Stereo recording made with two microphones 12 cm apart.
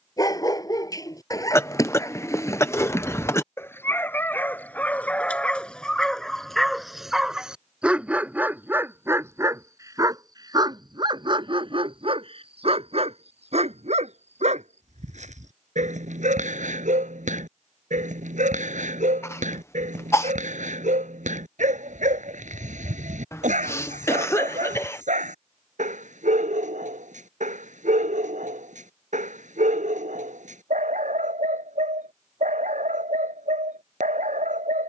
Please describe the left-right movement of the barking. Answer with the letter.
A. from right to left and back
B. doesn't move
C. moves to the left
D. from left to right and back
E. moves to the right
E.